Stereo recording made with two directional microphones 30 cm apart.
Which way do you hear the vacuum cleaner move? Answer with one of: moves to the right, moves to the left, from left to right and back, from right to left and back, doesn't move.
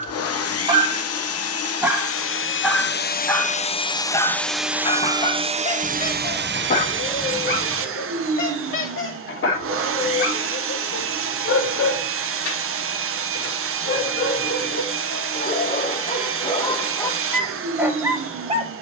moves to the right.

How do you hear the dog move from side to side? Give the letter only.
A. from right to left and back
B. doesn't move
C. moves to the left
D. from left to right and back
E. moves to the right
A.